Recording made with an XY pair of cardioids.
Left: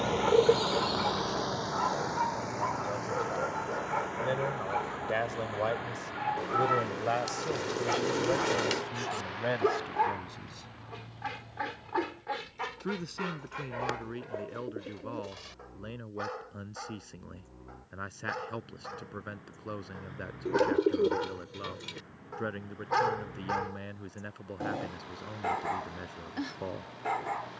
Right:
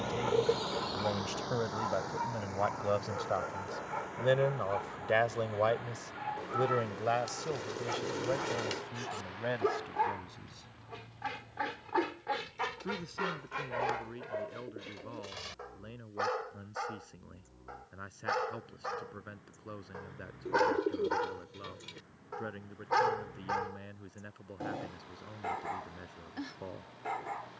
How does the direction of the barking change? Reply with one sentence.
You can hear the barking go right and come back.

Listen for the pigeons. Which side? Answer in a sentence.
In this clip you hear the pigeons on the left.